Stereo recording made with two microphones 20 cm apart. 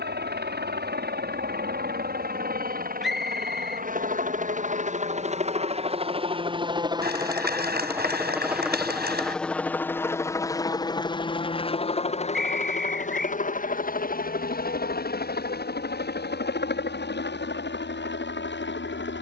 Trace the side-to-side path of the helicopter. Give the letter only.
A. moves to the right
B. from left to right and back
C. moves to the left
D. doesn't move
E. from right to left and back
C.